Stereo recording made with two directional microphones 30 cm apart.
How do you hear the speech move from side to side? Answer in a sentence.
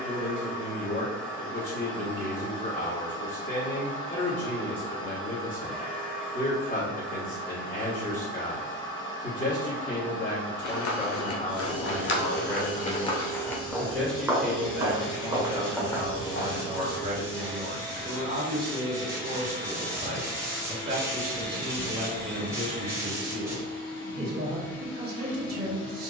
You can hear the speech move to the right.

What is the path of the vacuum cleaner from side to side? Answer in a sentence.
You can hear the vacuum cleaner stay put.